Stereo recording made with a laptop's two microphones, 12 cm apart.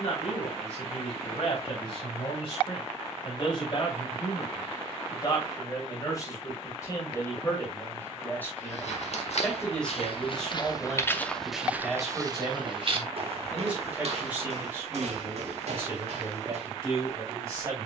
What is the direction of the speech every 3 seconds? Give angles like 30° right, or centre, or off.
50° left, 40° left, 20° left, centre, 10° right, 20° right.